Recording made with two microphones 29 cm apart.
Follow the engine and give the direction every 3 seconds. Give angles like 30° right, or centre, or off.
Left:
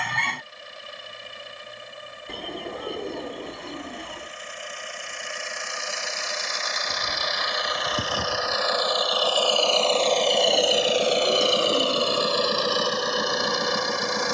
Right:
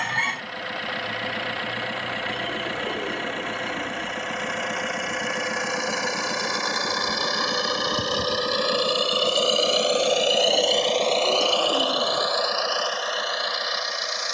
70° right, 70° right, 50° right, centre, 40° left.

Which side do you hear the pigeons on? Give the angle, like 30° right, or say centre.
centre.